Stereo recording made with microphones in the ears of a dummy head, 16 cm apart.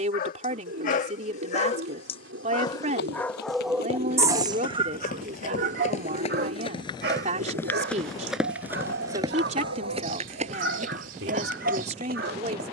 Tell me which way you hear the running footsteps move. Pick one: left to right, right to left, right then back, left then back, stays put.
left to right.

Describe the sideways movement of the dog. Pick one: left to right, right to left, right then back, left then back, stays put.
left to right.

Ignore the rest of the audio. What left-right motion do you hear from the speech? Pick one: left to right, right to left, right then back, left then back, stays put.
stays put.